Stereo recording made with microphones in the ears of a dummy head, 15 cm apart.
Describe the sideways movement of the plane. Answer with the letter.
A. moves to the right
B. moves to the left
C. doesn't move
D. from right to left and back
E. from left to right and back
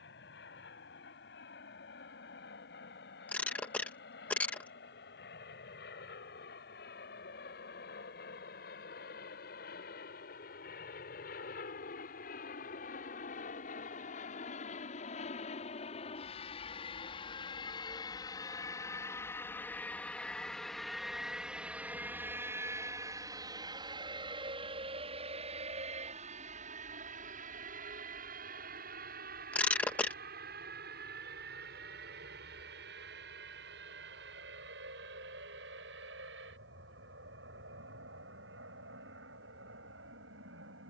A.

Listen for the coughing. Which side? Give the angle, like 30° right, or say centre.
10° left.